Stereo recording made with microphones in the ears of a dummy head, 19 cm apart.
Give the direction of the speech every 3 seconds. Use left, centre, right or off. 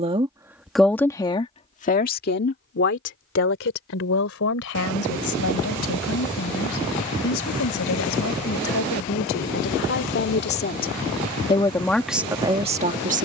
left, left, left, left, right.